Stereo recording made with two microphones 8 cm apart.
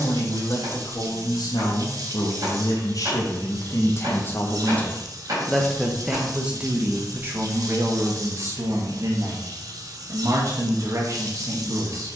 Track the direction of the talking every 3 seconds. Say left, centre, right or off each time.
left, left, right, right.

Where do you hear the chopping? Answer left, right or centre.
right.